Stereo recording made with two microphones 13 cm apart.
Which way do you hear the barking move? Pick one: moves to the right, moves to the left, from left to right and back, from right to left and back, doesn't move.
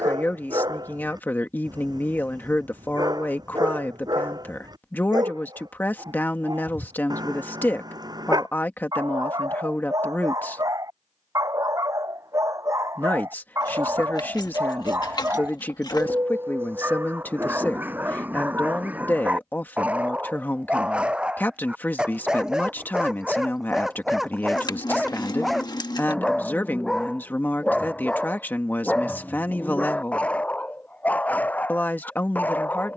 moves to the left.